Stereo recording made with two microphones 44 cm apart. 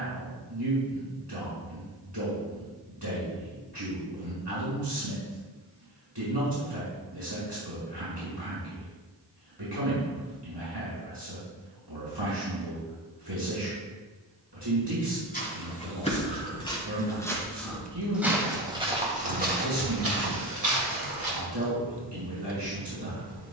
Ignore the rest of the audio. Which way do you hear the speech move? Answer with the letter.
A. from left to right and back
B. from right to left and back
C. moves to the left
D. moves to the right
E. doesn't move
E.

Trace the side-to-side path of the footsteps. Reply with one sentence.
You can hear the footsteps travel towards the right.